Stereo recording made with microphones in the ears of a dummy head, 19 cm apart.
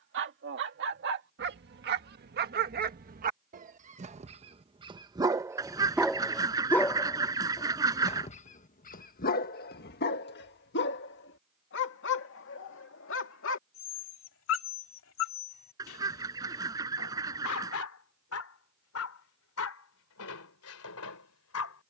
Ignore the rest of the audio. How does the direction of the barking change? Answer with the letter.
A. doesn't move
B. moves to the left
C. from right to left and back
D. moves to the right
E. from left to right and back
B.